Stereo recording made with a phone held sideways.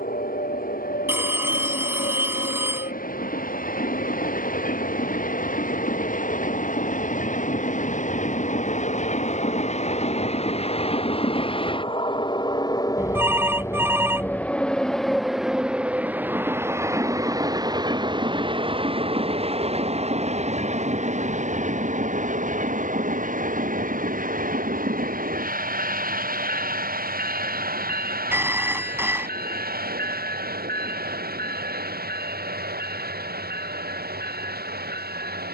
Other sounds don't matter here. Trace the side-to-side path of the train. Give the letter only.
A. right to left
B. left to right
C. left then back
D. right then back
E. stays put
B.